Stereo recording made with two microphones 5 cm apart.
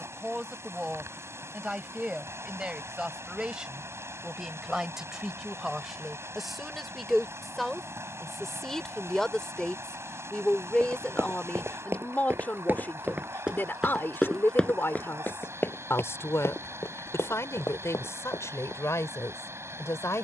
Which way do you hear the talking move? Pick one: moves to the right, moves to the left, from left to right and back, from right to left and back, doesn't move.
moves to the left.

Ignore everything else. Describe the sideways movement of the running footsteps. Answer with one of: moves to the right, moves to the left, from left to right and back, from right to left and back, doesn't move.
moves to the left.